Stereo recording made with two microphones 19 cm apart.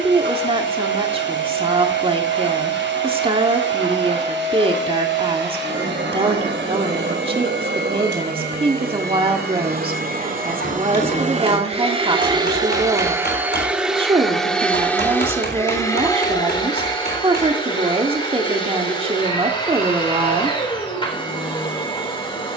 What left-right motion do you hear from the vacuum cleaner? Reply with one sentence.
You can hear the vacuum cleaner go from the right side to the left.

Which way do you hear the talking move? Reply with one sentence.
In this clip you hear the talking stay in one place.